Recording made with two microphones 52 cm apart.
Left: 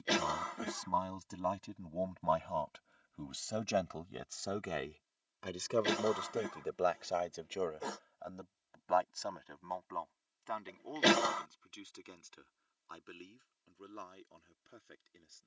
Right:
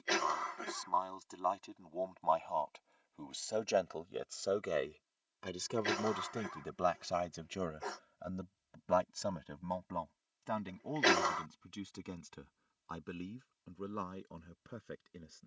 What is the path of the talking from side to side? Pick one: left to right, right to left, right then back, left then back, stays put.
left to right.